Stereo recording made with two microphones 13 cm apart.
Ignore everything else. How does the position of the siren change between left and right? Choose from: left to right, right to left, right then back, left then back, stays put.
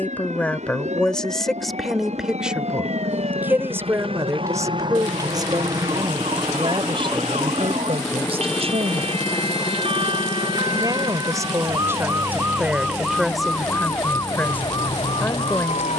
right to left.